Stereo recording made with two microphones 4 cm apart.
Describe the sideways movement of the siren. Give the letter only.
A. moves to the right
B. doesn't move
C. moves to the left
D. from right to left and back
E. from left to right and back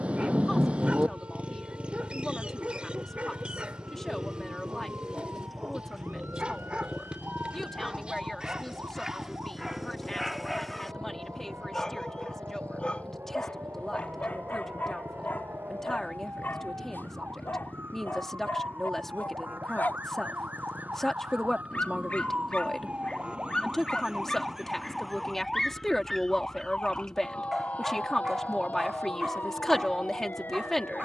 C.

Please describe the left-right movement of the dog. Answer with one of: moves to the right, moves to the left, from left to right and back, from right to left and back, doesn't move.
from right to left and back.